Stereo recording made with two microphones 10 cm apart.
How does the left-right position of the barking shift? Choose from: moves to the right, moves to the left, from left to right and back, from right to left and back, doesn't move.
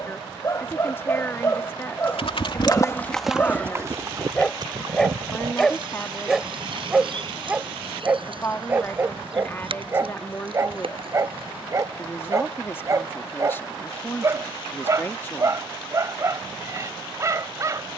moves to the right.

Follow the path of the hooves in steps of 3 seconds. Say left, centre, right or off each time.
left, right, right, right, off, off.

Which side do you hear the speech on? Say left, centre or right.
left.